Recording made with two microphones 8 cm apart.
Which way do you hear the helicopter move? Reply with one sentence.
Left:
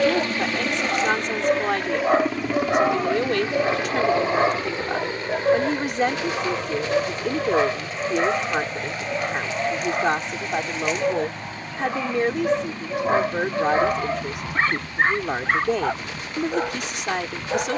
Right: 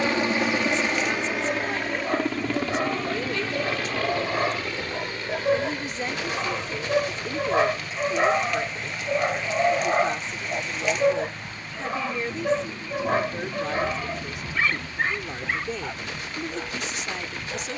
You can hear the helicopter travel towards the left.